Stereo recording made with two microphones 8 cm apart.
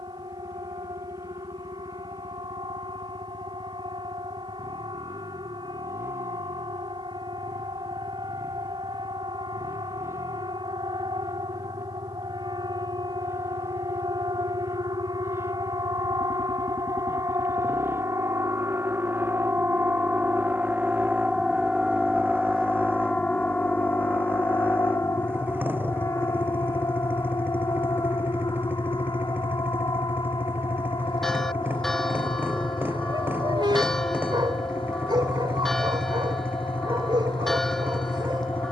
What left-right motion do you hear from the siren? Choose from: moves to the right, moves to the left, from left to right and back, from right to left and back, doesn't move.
moves to the left.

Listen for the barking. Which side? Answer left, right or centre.
right.